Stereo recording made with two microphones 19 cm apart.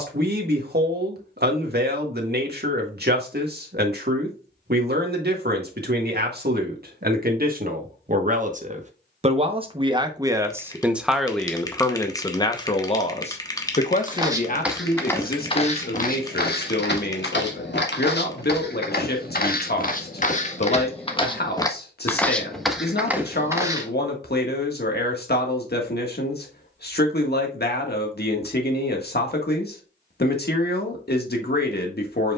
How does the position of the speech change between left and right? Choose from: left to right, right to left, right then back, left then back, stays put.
right to left.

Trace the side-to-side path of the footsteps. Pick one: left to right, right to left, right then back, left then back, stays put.
left then back.